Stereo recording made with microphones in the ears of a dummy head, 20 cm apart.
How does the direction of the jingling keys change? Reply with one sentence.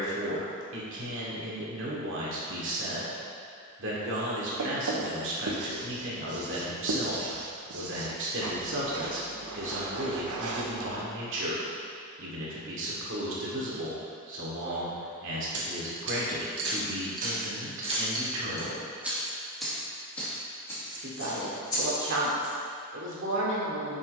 You can hear the jingling keys travel towards the left.